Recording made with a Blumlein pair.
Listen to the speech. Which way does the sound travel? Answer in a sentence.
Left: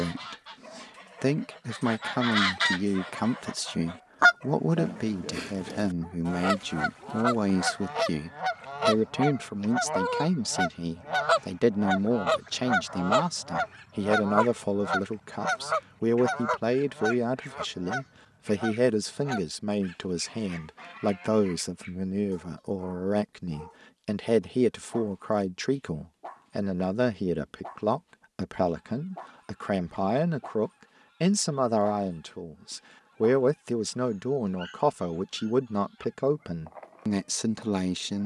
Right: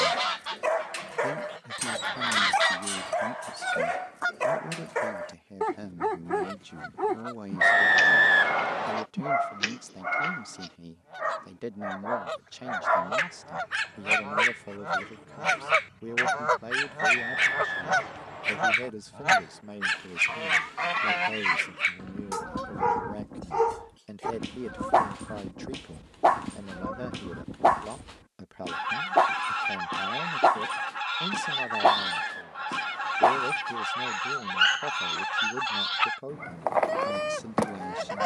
You can hear the speech stay put.